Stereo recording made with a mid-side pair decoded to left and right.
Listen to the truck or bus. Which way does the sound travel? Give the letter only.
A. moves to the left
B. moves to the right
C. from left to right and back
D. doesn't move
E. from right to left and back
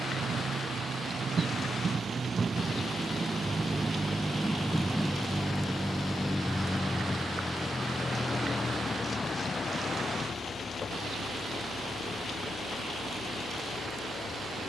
A.